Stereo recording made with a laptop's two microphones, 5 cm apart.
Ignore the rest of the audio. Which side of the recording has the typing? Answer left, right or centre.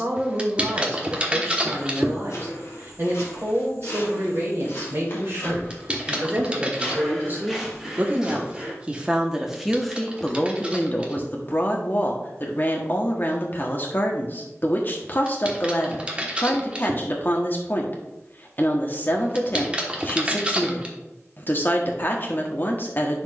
right.